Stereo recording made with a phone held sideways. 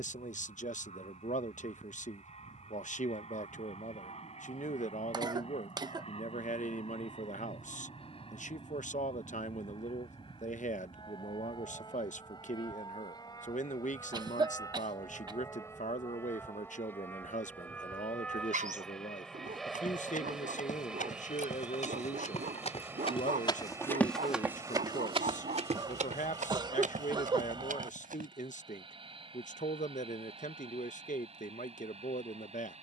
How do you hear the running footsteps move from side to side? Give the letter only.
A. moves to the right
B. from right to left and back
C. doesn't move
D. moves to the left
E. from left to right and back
A.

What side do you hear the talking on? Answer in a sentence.
In this clip you hear the talking on the left.